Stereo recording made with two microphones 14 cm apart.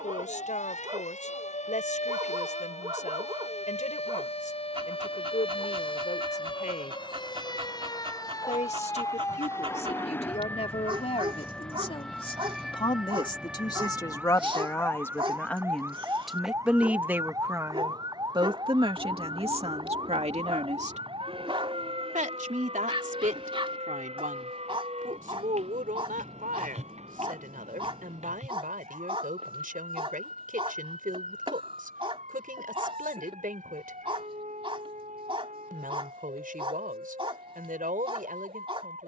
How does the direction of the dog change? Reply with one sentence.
You can hear the dog stay in one place.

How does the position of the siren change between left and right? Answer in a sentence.
You can hear the siren move to the right.